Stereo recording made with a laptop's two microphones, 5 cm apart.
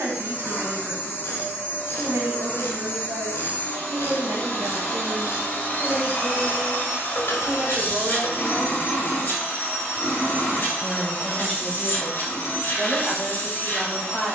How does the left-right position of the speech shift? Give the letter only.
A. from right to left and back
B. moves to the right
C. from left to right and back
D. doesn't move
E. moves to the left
E.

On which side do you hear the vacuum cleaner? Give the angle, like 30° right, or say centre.
40° left.